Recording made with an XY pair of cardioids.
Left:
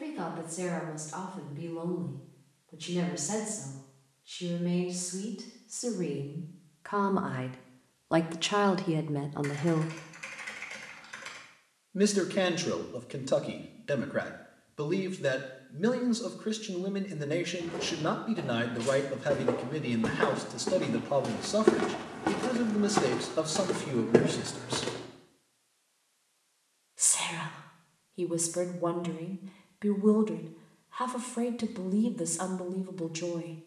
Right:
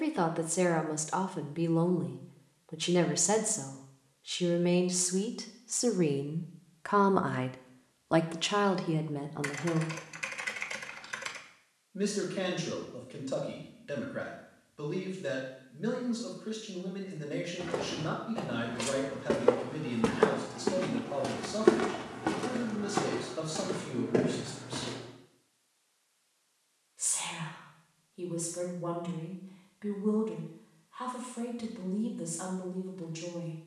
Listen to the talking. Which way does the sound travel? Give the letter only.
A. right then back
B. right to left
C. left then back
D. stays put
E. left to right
B.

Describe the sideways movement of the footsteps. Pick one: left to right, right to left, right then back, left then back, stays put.
right to left.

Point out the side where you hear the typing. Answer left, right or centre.
right.